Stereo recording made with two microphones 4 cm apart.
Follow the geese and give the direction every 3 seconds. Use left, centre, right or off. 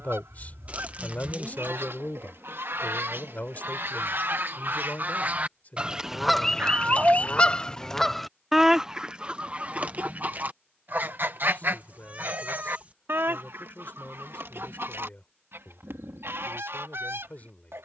right, right, centre, right, right, right.